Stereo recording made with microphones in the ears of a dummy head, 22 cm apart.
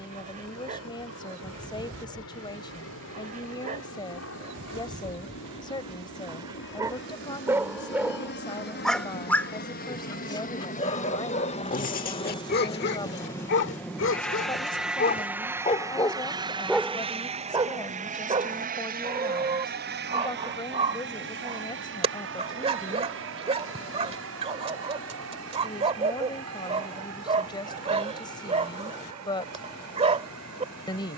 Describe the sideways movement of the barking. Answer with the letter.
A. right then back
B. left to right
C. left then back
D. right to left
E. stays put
C.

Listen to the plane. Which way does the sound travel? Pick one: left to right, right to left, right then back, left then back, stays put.
left to right.